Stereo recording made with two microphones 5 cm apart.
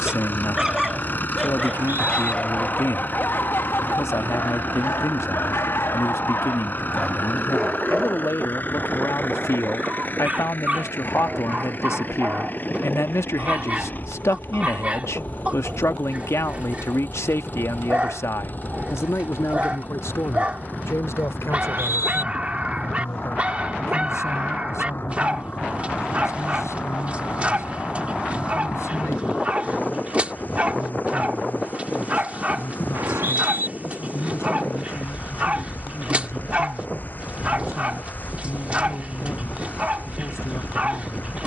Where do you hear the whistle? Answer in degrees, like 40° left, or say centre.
60° right.